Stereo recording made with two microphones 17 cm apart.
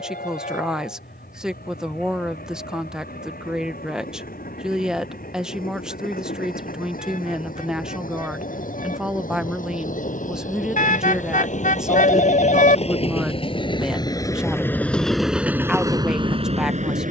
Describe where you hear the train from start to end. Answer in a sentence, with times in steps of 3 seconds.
You can hear the train on the left from 0 s and on the right from 15 s.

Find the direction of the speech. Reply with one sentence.
You can hear the speech in the centre.